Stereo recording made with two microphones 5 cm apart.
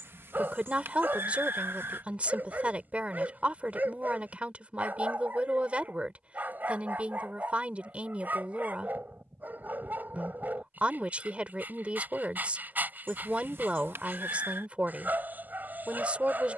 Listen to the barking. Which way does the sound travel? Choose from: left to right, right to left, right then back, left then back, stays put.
stays put.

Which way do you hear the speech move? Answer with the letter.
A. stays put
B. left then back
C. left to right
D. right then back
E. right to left
A.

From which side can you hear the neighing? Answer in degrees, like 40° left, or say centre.
50° right.